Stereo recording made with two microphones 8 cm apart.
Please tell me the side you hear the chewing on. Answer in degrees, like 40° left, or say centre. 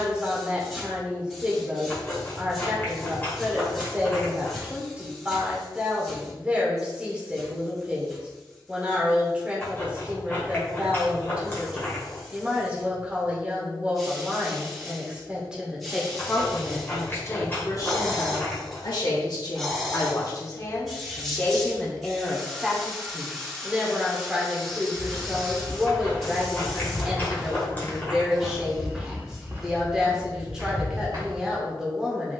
20° left.